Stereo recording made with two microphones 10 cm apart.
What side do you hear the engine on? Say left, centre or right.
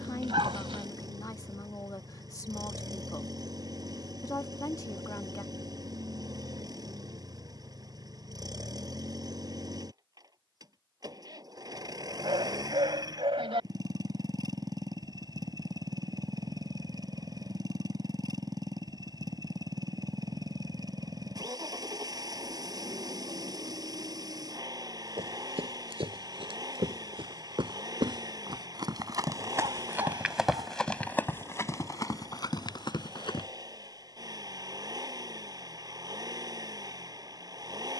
right.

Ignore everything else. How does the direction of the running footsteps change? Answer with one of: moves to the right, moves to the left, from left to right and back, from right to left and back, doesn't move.
moves to the left.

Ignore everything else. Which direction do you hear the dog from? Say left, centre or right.
right.